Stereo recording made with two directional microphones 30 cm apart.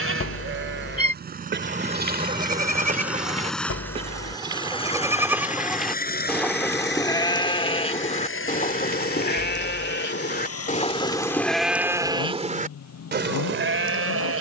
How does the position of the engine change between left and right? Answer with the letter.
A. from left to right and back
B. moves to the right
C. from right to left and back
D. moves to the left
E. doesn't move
D.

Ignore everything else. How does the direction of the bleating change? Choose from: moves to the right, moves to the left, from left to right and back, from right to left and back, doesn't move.
from right to left and back.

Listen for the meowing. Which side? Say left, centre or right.
left.